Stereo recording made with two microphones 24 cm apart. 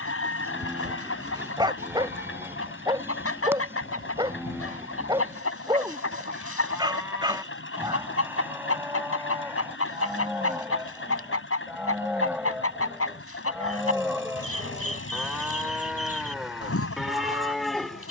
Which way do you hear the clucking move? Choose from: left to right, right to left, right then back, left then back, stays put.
stays put.